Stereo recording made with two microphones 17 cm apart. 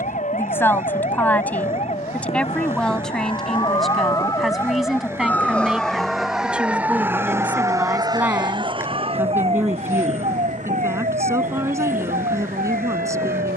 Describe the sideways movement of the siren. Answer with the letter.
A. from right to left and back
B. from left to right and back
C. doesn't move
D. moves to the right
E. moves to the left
D.